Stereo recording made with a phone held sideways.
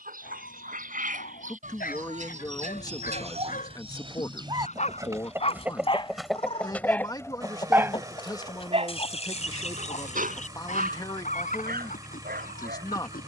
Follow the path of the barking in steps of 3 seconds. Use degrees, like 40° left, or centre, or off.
60° left, 50° left, 10° right, 60° right, 70° right.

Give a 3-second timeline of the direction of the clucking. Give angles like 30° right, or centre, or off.
60° right, 30° right, 20° left, 50° left, 60° left.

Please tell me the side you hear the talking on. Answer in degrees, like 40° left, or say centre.
20° left.